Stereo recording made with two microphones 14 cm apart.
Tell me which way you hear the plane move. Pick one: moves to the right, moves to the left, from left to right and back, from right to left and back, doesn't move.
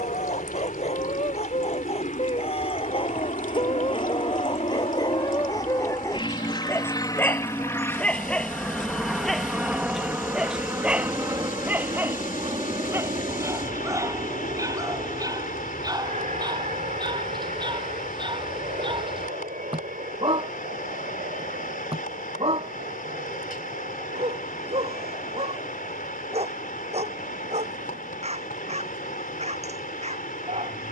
moves to the right.